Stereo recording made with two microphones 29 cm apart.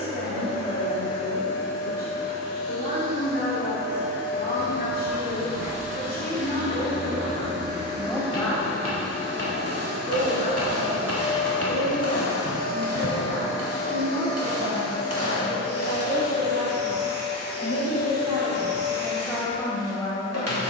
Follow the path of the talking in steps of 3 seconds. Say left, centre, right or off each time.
left, left, left, right, right, right, centre.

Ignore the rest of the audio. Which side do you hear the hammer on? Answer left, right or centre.
right.